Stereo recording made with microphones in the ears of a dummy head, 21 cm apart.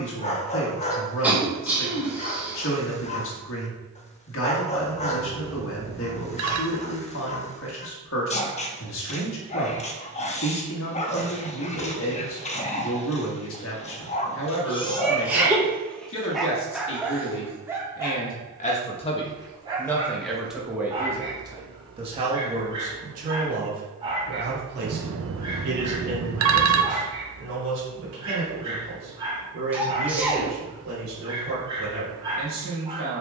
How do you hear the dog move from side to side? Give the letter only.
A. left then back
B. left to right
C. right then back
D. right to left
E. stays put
B.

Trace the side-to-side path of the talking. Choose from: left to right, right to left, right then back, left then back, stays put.
left to right.